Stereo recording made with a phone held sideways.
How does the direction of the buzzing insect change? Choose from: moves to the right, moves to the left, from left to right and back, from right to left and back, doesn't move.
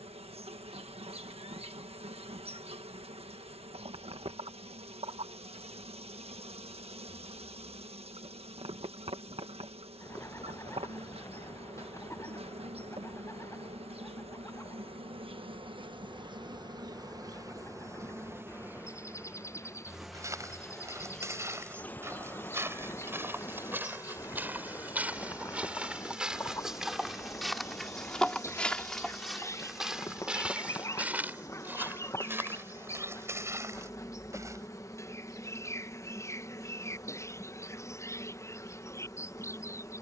moves to the left.